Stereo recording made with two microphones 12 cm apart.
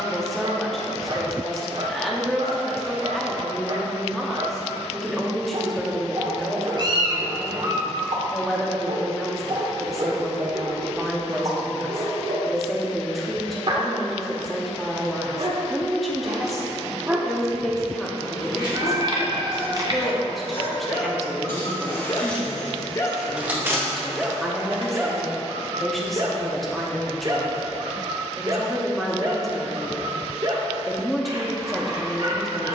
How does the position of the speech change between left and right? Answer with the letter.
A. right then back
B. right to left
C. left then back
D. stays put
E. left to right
D.